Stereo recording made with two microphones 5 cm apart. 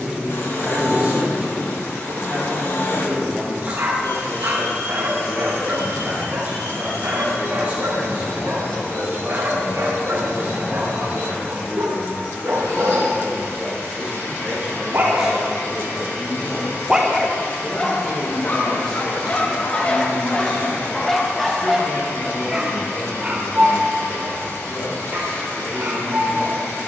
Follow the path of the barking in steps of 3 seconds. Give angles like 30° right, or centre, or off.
50° right, 50° right, 50° right, 50° right, 50° right, 10° right, 30° left, 10° right, 50° right.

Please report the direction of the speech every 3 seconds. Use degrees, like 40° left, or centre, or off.
30° right, 30° right, 30° right, 30° right, 20° right, centre, 20° left, 40° left, 50° left.